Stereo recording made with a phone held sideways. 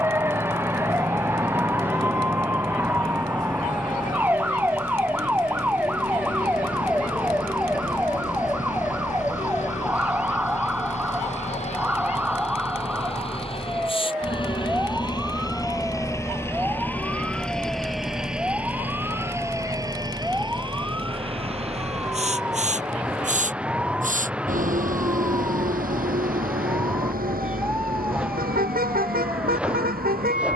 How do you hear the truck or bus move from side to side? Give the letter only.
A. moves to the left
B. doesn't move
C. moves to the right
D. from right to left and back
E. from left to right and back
C.